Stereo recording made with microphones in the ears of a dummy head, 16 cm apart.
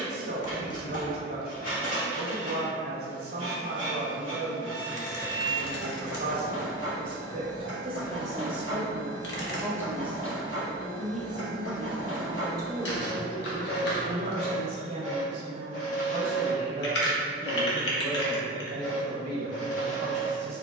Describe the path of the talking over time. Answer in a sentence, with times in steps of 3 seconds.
In this clip you hear the talking on the right from 0 s, in the centre from 9 s and on the right from 12 s.